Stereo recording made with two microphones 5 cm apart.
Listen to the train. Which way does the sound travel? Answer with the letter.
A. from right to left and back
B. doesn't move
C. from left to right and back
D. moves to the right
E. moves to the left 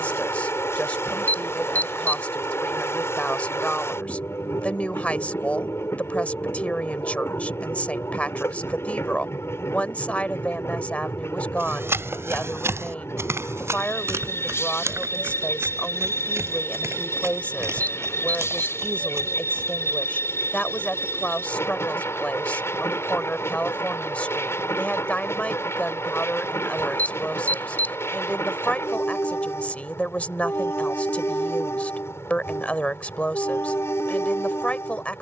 B.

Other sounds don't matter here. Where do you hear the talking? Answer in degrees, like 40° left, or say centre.
30° left.